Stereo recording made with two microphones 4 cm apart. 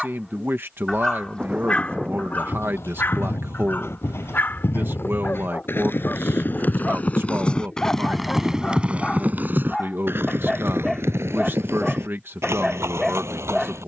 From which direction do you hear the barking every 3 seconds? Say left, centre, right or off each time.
left, left, left, centre, centre.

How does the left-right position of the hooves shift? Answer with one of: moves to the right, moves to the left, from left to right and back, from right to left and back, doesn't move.
moves to the right.